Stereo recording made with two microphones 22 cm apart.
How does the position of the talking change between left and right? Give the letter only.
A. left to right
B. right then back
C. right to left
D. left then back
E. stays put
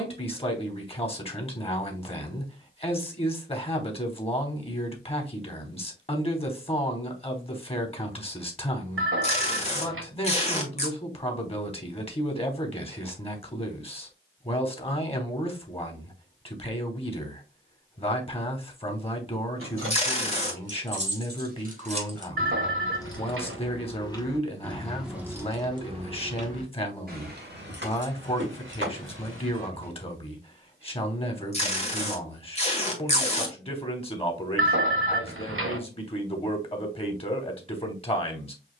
E.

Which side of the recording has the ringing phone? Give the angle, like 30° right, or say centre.
70° right.